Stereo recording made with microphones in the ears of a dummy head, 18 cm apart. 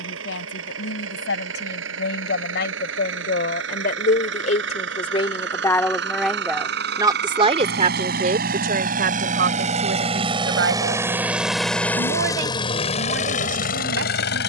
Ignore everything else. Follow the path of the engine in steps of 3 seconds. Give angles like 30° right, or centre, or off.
70° right, 60° right, 50° right, 20° right, 40° left.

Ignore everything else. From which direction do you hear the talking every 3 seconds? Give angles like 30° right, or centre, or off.
70° left, 40° left, 30° right, 60° right, 70° right.